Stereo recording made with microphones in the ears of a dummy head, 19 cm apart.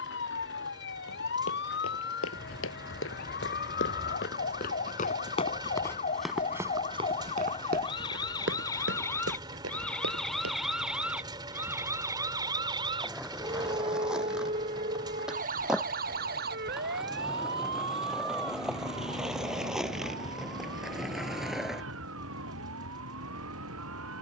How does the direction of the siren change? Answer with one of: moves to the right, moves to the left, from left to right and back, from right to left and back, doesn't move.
moves to the right.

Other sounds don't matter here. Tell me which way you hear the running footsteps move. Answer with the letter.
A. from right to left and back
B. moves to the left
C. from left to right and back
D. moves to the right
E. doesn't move
D.